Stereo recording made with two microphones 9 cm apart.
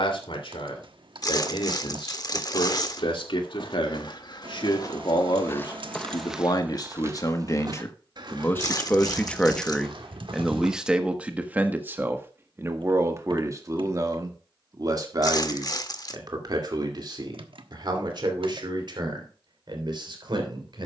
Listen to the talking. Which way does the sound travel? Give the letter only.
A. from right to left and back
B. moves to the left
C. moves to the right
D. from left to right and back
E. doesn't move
C.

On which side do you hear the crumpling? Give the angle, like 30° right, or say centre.
50° left.